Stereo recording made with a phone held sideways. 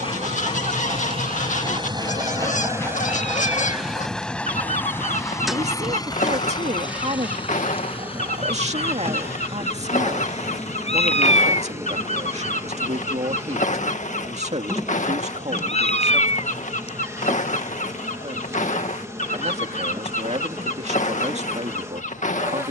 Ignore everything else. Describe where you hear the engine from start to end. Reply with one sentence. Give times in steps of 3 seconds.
You can hear the engine on the right from 0 s, in the centre from 3 s and on the left from 6 s.